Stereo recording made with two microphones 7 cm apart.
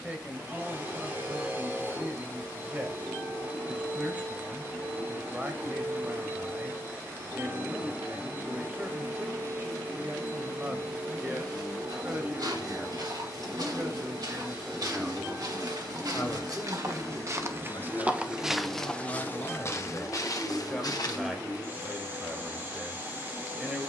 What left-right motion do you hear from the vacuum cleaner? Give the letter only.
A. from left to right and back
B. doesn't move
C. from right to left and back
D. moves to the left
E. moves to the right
B.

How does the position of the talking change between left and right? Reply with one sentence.
You can hear the talking move from right to left and back again.